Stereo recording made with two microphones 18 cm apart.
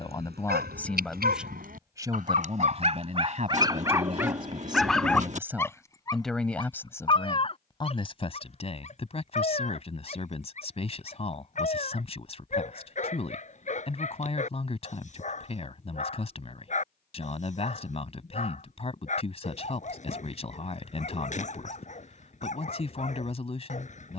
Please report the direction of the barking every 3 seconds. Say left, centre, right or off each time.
right, centre, left, left, left, left, left, left.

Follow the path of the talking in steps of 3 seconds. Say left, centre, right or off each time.
centre, right, left, left, left, left, left, left.